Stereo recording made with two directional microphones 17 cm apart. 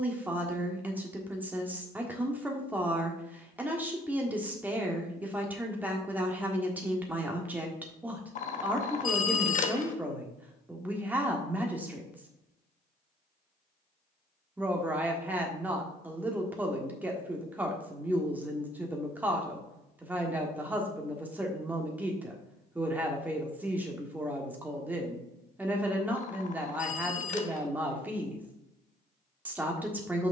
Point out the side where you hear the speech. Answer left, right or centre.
centre.